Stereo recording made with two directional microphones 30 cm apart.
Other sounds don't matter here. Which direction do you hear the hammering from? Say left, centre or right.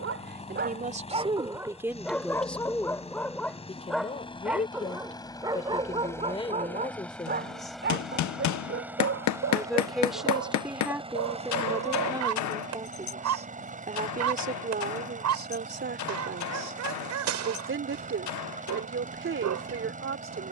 left.